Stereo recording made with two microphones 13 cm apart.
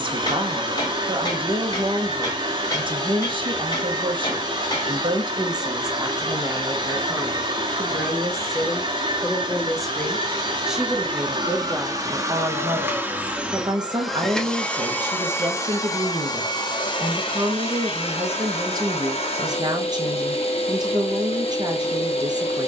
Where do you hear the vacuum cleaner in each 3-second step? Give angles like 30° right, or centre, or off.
40° right, 40° right, 40° right, 40° right, 10° right, 30° left, 50° left, 50° left.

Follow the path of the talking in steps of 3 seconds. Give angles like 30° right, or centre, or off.
40° right, 40° right, 10° right, centre, 30° right, 30° right, 30° right, 30° right.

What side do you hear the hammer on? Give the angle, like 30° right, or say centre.
30° left.